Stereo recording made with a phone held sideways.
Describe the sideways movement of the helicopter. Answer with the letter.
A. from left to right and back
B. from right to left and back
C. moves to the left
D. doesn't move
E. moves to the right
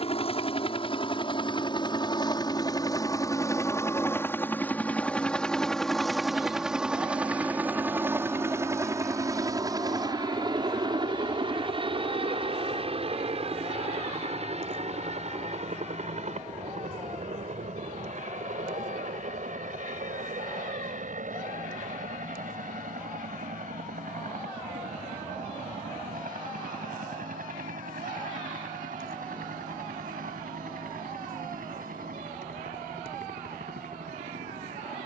E.